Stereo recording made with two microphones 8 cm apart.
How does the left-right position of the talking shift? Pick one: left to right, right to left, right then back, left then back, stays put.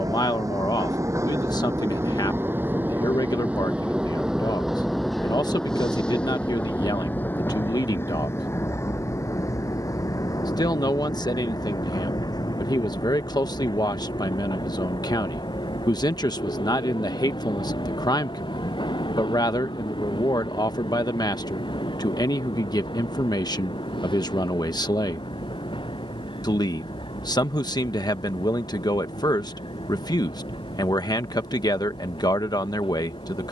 stays put.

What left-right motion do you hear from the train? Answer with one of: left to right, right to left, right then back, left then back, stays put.
right to left.